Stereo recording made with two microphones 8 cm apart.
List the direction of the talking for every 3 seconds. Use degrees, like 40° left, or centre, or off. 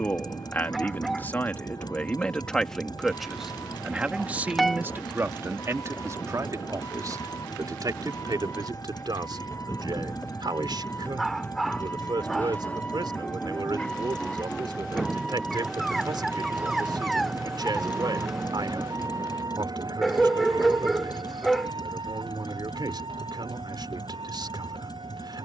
20° left, 20° right, 50° right, 60° right, 60° right, 60° right, 60° right, 60° right, 60° right.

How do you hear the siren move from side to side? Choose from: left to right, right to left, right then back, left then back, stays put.
left to right.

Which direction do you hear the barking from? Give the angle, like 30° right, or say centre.
centre.